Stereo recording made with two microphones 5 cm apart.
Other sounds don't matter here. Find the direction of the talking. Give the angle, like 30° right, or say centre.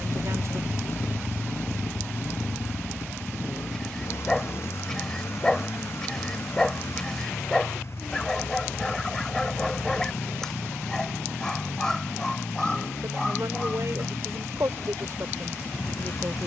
60° right.